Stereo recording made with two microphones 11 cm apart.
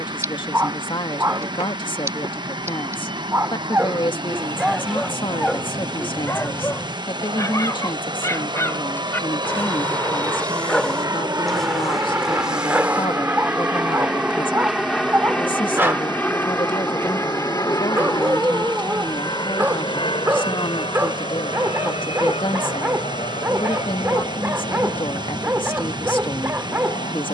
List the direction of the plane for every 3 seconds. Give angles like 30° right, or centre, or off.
70° right, 60° right, 50° right, 40° right, 10° right, 20° left, 40° left, 60° left, 60° left.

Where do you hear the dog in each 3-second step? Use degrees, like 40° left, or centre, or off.
30° right, 10° right, 30° left, 10° left, 10° right, 20° right, 20° right, 20° right, 20° right.